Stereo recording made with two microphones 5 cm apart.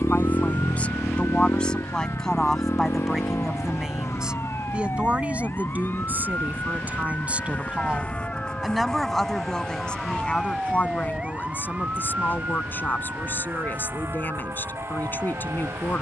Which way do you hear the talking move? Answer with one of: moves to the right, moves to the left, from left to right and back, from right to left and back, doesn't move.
from left to right and back.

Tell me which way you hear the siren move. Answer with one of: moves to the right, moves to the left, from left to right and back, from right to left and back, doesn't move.
moves to the right.